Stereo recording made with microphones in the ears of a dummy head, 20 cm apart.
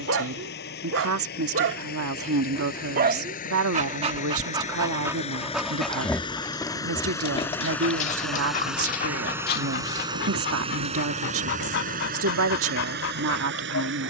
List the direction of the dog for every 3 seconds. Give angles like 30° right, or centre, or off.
50° right, 20° right, 20° left, 50° left, 60° left.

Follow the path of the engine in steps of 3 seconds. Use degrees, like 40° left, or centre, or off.
40° left, 30° left, 10° left, 20° right, 50° right.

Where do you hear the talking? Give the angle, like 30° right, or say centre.
70° right.